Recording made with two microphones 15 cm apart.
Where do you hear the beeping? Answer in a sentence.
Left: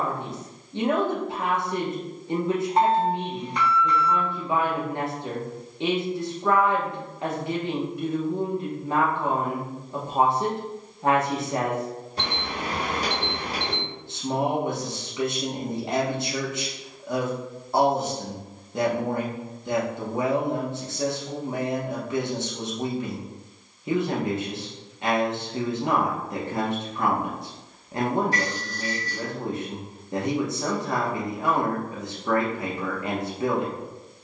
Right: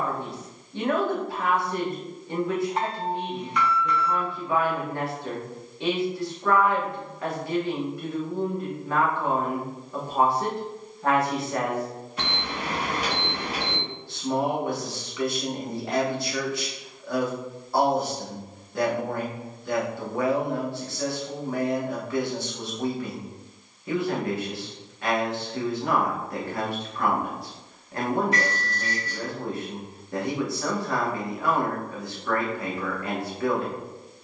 In this clip you hear the beeping on the left.